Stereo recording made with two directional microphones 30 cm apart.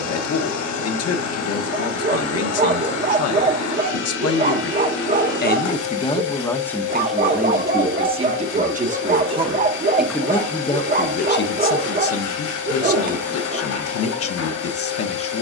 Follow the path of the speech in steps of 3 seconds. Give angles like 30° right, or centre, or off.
50° left, 40° left, 10° right, 10° left, 50° left.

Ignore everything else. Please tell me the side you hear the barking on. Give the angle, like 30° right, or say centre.
30° right.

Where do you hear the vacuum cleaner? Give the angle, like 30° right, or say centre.
70° left.